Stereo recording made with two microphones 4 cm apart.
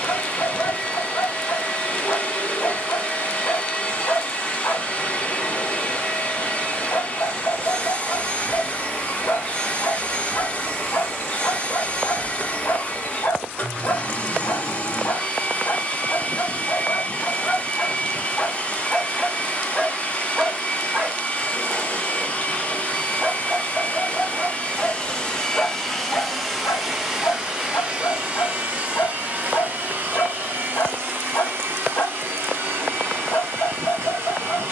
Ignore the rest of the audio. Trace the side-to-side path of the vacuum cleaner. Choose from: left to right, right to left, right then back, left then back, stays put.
left to right.